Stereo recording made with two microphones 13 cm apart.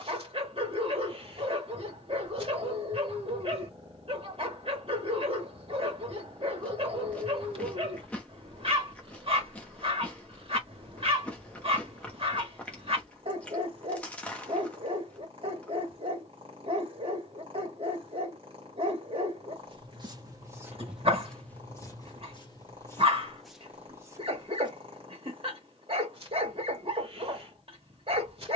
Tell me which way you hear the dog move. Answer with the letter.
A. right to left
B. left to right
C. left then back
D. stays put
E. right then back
D.